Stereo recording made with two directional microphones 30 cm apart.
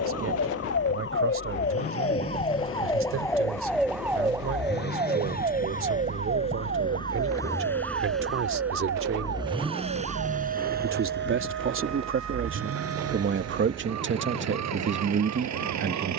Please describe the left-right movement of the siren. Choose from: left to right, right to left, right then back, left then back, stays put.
left to right.